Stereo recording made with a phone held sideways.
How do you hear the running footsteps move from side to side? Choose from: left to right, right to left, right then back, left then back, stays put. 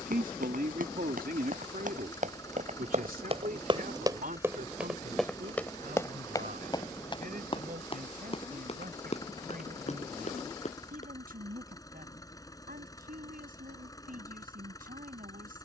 right to left.